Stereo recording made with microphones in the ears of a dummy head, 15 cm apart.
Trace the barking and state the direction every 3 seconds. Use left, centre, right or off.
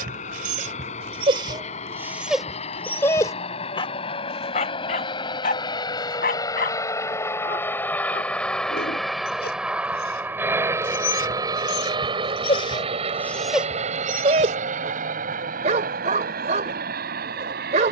right, left, left, left, centre, right.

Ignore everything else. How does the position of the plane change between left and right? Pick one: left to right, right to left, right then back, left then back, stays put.
left to right.